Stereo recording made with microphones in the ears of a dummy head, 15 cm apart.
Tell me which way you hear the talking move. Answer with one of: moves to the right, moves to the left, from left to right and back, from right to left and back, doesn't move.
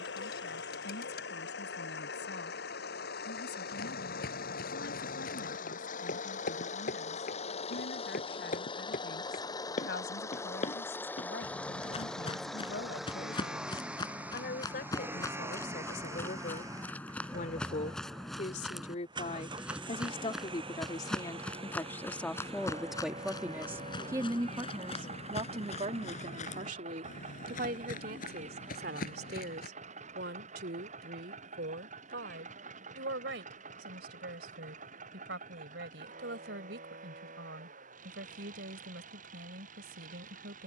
moves to the right.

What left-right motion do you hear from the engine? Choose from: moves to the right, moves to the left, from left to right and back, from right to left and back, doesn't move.
moves to the right.